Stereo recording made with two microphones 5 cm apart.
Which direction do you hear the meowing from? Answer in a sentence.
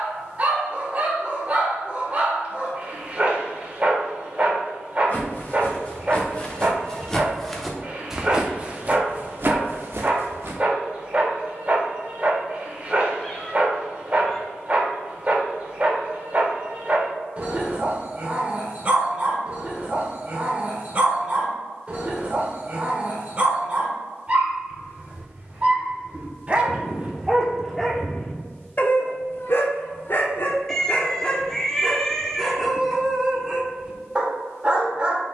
You can hear the meowing in the centre.